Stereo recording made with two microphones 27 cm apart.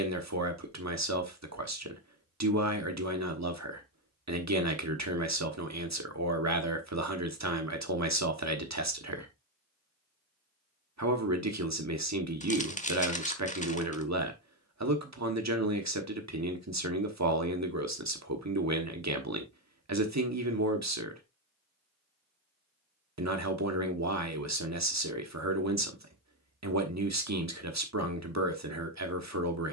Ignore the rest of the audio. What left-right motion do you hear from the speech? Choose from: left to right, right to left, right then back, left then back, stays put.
stays put.